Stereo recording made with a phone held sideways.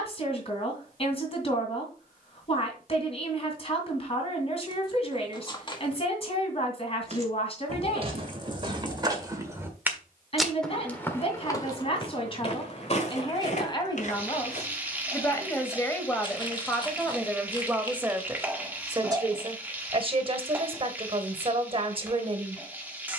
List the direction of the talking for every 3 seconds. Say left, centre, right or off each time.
left, left, left, left, left, centre, right, right.